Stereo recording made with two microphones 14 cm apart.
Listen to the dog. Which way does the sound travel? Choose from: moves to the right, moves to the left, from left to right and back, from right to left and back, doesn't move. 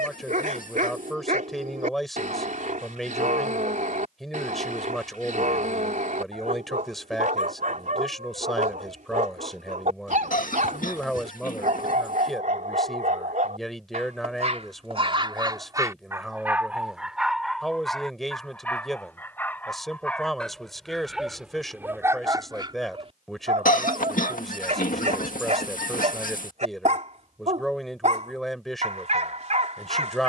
from right to left and back.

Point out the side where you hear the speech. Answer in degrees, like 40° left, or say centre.
centre.